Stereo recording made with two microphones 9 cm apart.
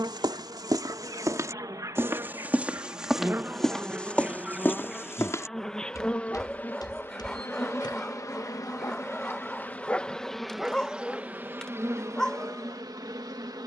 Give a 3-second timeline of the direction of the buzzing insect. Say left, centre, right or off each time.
right, centre, left, centre, right.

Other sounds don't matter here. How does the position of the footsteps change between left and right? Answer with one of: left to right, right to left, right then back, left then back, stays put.
right to left.